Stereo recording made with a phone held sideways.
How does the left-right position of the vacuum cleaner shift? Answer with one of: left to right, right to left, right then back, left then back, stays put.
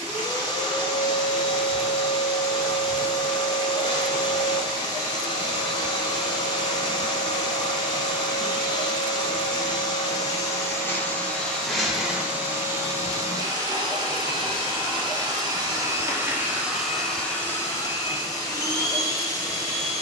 right then back.